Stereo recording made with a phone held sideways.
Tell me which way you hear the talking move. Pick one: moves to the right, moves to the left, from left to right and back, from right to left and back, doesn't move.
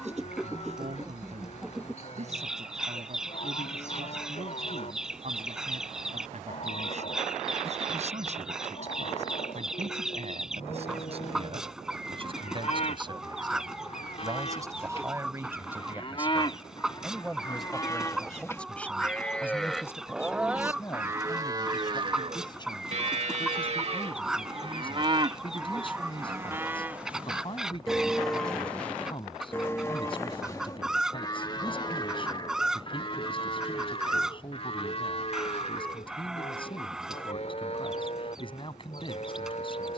moves to the left.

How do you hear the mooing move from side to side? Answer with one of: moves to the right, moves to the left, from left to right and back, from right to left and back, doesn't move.
from left to right and back.